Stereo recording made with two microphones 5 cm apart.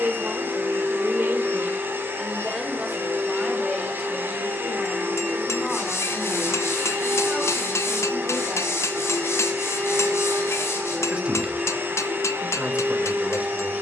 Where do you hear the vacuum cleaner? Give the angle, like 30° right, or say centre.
50° right.